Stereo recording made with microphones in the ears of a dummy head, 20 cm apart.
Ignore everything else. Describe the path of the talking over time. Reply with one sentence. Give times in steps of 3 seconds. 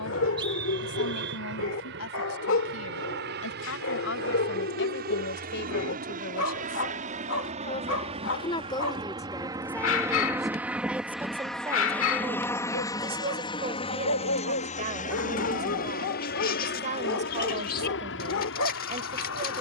In this clip you hear the talking on the left from 0 s, in the centre from 9 s and on the right from 12 s.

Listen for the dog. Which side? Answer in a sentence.
You can hear the dog on the left.